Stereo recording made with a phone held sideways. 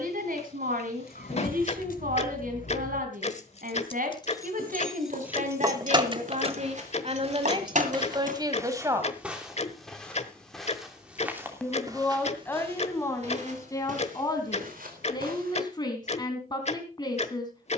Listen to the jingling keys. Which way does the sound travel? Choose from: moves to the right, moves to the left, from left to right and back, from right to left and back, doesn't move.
moves to the right.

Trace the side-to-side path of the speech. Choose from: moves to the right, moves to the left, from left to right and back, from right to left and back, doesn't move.
moves to the left.